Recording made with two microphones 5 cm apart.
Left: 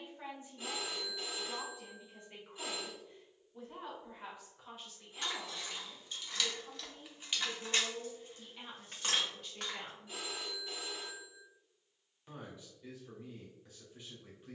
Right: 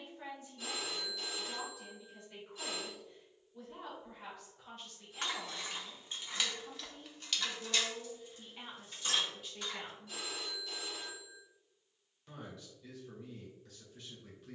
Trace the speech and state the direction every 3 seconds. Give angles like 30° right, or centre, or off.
20° left, 10° left, 10° right, centre, 20° left.